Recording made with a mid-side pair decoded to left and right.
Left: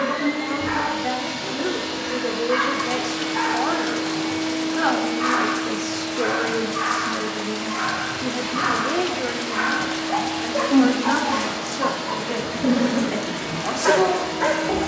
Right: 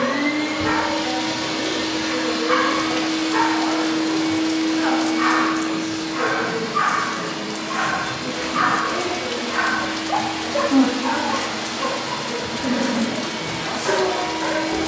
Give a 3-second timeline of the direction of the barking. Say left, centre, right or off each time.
right, right, right, centre, left.